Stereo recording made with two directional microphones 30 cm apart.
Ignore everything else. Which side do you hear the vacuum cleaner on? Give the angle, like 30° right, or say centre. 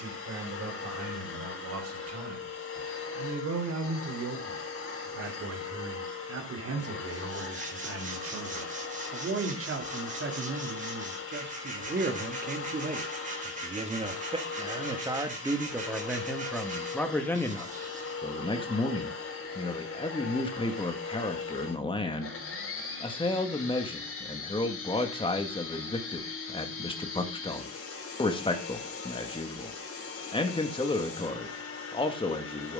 50° left.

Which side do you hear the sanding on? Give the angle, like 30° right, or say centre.
30° right.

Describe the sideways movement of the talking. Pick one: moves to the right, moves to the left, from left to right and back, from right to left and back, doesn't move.
moves to the left.